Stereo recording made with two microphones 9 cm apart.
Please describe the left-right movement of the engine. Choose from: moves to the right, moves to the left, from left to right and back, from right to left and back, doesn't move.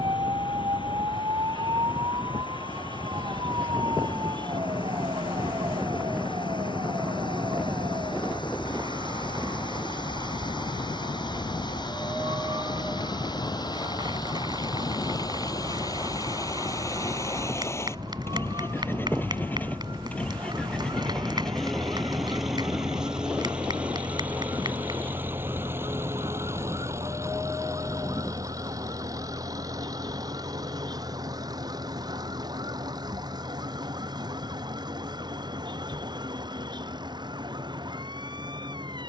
moves to the right.